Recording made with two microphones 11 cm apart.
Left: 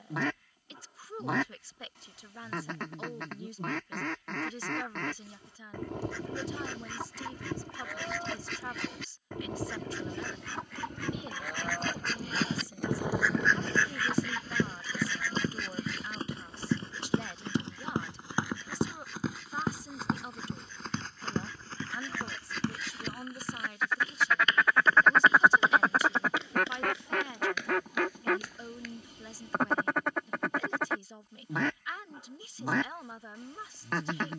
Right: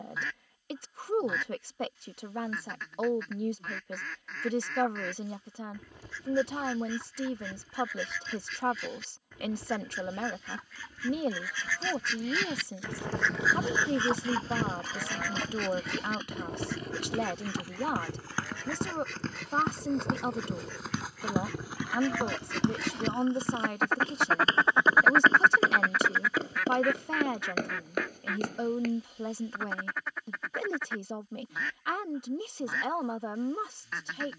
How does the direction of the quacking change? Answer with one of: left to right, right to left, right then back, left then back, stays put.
right then back.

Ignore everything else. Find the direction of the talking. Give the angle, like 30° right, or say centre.
60° right.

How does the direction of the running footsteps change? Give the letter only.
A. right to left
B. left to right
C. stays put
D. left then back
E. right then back
B.